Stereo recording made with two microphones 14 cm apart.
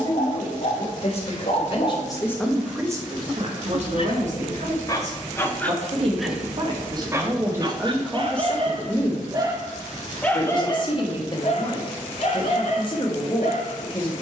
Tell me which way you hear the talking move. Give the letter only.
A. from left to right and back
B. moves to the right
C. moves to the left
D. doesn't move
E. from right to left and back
A.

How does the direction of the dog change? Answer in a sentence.
You can hear the dog move from left to right and back again.